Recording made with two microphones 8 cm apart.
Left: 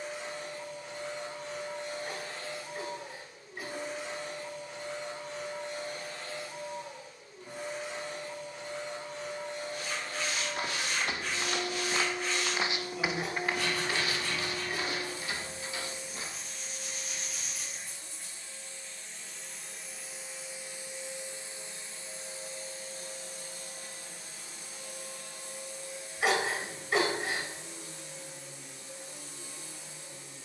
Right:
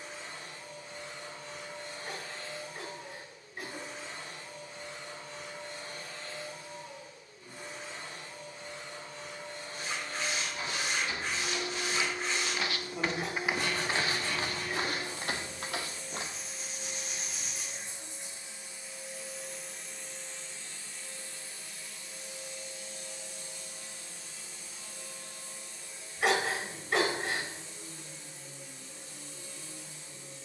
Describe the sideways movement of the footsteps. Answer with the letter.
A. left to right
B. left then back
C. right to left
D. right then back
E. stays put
A.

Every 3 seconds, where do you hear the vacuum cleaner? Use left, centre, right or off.
left, left, left, left, left, centre, centre, left, left, left.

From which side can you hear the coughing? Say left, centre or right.
centre.